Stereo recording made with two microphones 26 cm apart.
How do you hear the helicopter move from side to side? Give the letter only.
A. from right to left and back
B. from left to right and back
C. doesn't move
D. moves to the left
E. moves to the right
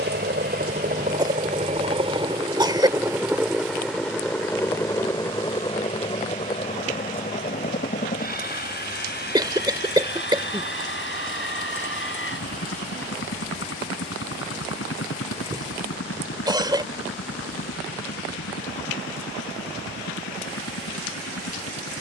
D.